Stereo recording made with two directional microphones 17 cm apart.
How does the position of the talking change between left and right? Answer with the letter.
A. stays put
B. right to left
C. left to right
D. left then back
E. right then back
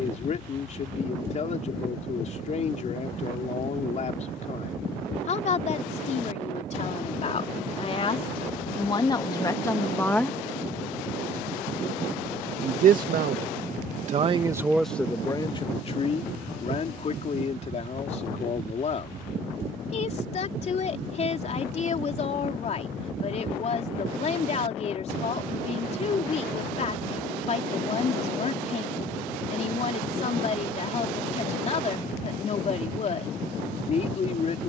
E.